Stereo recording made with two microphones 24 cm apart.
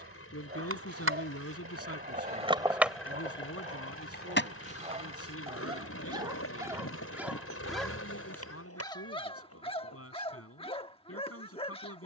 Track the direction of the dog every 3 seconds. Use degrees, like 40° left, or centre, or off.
40° right, 30° right, centre, 20° left.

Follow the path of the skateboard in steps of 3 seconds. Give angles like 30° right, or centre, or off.
40° right, 40° left, 70° left, 80° left.